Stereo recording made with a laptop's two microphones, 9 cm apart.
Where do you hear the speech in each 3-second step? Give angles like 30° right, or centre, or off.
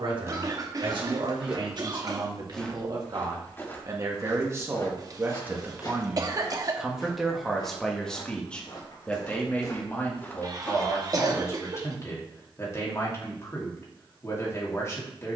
60° right, 30° right, centre, 20° left, 30° left.